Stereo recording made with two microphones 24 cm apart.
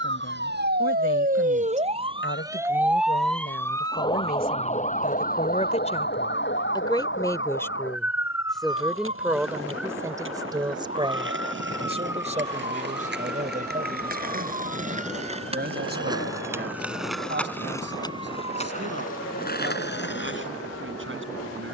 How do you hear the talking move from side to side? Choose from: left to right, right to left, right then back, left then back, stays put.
left to right.